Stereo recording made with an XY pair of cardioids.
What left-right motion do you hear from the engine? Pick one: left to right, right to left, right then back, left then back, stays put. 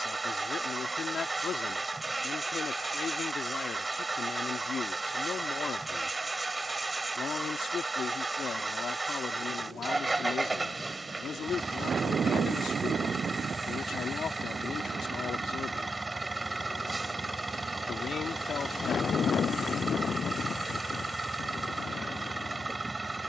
stays put.